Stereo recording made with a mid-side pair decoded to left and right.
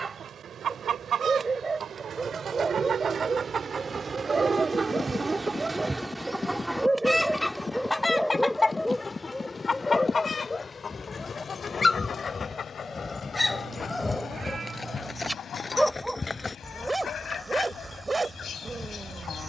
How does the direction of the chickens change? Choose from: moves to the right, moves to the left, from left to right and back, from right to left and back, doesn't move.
moves to the left.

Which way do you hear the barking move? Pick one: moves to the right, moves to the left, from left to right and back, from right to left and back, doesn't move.
from right to left and back.